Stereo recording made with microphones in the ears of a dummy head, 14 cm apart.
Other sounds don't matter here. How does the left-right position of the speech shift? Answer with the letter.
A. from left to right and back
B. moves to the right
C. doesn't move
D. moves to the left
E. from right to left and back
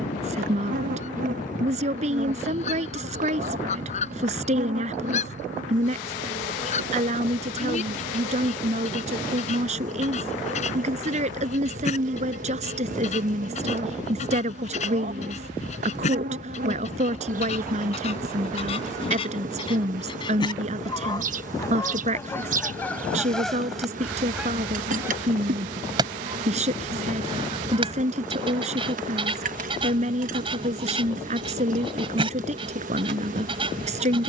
C.